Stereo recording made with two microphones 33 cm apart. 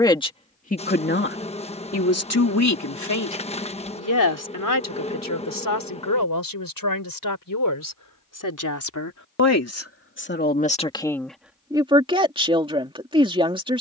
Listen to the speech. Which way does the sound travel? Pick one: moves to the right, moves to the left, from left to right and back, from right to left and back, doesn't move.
from right to left and back.